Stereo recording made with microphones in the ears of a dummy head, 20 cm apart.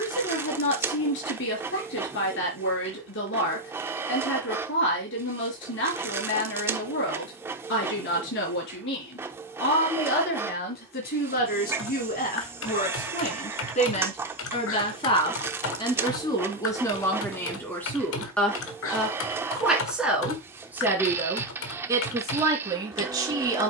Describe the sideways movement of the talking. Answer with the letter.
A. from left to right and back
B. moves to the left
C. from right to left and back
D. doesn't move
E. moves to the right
E.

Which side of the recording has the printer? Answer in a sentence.
In this clip you hear the printer in the centre.